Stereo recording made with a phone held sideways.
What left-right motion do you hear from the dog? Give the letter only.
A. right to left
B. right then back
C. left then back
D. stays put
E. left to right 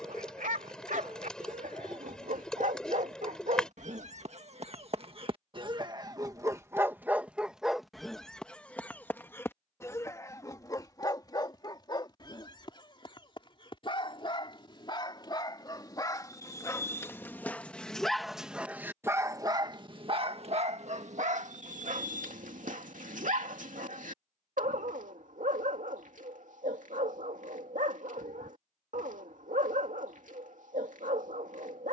C.